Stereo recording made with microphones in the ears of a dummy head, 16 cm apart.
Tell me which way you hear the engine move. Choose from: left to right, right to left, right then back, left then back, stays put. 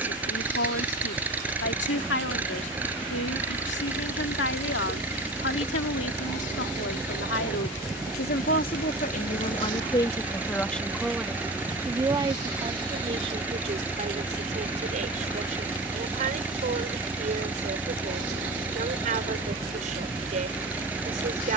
stays put.